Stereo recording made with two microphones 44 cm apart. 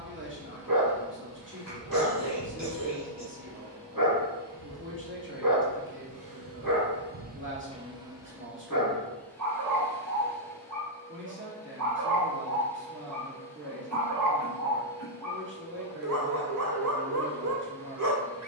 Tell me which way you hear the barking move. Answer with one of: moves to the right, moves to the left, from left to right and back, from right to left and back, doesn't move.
doesn't move.